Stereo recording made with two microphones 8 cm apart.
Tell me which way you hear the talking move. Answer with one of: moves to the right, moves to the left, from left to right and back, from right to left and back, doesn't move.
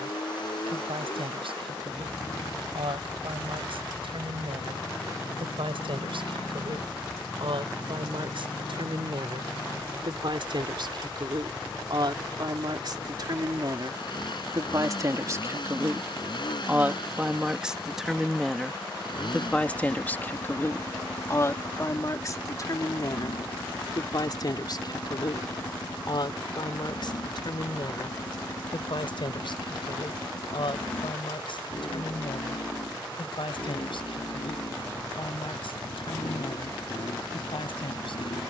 moves to the left.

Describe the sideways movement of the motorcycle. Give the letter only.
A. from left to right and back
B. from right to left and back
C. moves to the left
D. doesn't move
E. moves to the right
D.